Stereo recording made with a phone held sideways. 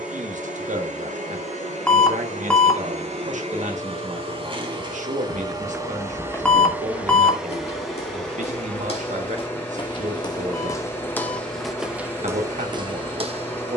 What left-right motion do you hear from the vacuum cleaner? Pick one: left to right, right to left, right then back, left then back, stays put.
right to left.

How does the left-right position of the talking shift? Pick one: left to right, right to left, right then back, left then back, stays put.
stays put.